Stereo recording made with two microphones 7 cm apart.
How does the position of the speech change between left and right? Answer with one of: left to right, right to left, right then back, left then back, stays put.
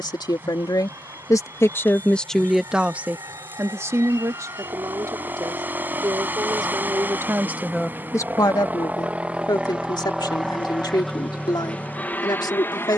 right then back.